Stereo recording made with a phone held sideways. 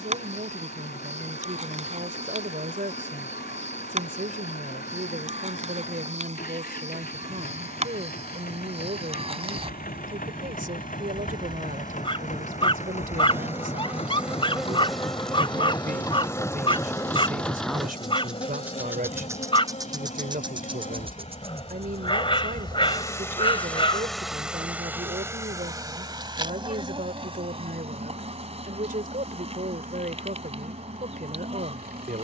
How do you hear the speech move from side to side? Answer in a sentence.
In this clip you hear the speech stay in one place.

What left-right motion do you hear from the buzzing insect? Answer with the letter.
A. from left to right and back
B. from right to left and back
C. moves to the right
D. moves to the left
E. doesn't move
B.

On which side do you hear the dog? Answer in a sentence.
In this clip you hear the dog on the left.